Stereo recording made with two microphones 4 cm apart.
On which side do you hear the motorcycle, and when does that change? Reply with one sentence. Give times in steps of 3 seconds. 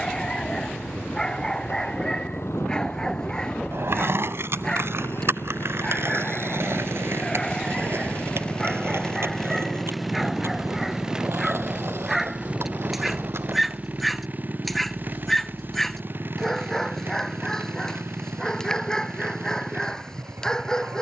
In this clip you hear the motorcycle on the left from 0 s, in the centre from 9 s and on the right from 12 s.